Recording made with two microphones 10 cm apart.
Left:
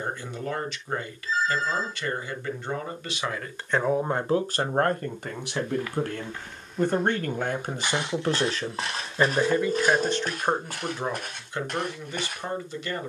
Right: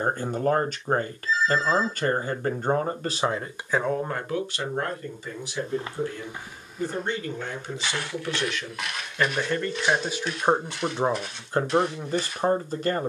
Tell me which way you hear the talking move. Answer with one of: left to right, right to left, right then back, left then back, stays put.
left then back.